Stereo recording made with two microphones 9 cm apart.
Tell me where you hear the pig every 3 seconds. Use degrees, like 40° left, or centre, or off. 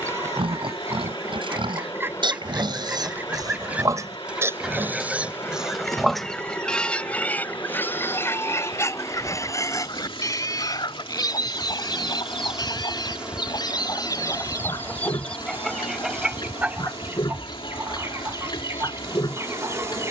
60° right, 30° right, 20° left, 40° left, 50° left, 50° left, 50° left.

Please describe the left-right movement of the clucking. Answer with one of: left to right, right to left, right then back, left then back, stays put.
left then back.